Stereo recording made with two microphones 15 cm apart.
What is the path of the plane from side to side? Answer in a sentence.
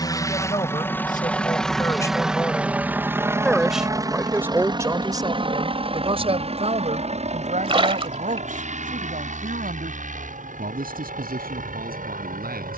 You can hear the plane move from left to right.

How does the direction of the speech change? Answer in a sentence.
You can hear the speech go from the left side to the right.